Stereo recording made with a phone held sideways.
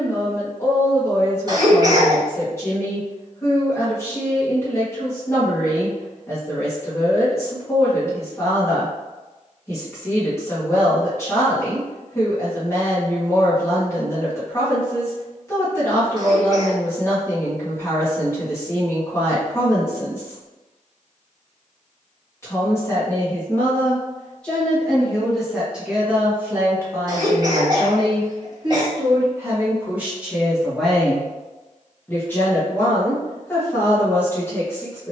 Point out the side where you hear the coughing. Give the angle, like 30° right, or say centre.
30° right.